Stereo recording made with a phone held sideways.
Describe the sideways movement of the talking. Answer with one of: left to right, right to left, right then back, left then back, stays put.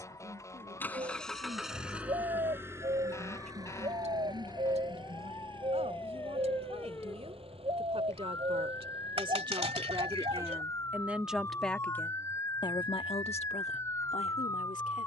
right to left.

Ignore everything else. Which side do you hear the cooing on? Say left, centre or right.
right.